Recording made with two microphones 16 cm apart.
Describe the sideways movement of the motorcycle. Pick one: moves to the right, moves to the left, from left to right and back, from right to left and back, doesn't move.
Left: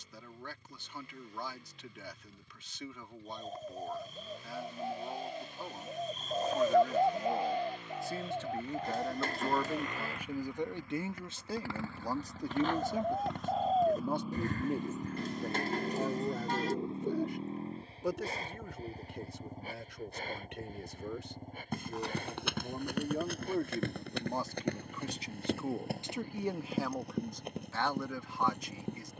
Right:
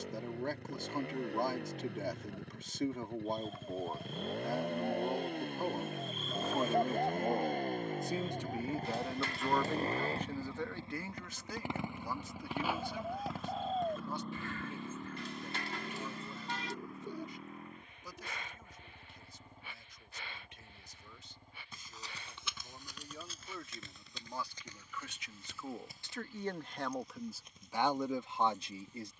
moves to the left.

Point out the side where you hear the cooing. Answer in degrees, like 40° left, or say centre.
40° left.